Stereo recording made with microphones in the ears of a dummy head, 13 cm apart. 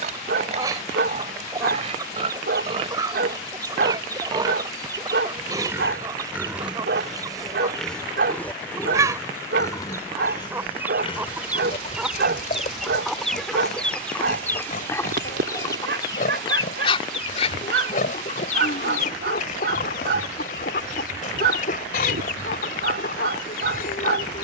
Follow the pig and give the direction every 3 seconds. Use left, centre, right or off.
right, right, centre, left, left, left, left, left.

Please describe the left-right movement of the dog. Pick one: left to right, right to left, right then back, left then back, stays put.
stays put.